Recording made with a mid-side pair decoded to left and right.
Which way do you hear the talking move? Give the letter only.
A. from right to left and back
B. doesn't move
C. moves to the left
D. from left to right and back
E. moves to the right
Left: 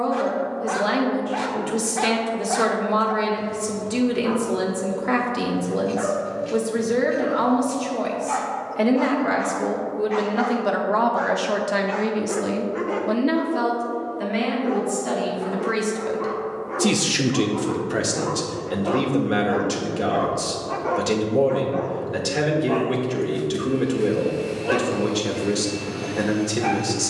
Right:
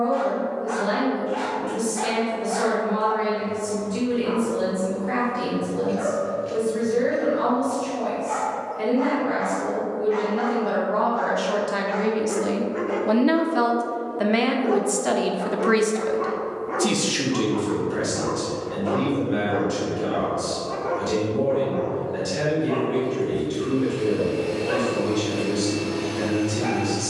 D.